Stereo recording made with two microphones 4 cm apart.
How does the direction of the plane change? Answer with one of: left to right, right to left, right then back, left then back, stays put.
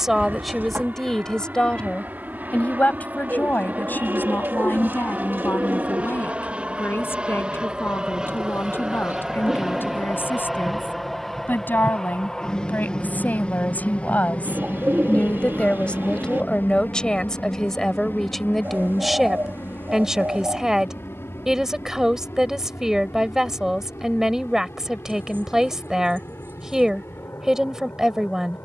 right to left.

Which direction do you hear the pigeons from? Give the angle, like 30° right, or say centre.
60° right.